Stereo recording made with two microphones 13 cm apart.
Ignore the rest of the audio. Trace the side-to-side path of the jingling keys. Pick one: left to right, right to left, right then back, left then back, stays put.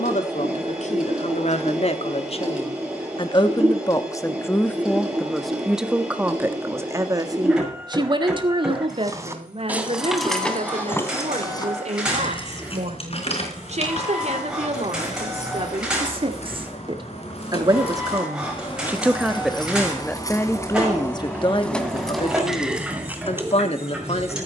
left then back.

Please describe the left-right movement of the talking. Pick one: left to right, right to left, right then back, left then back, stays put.
right then back.